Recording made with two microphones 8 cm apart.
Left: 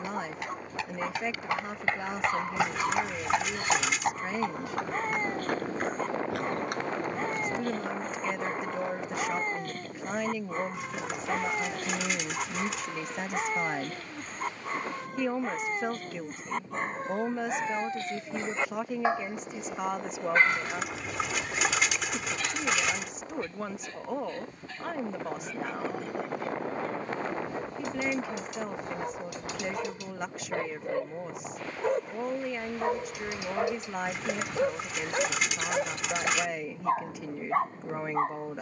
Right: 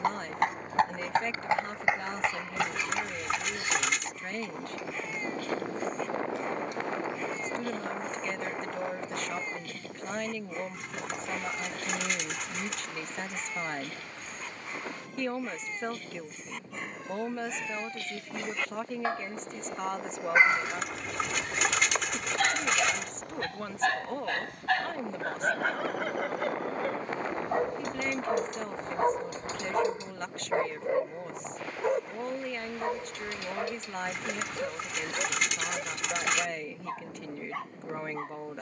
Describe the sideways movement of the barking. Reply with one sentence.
In this clip you hear the barking move from left to right and back again.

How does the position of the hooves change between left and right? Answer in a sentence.
In this clip you hear the hooves move to the left.